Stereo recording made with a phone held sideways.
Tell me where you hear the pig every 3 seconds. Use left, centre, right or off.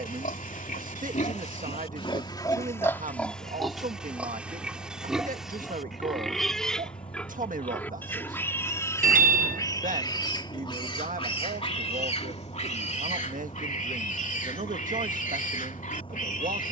left, centre, centre, left, left, left.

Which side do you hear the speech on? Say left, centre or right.
right.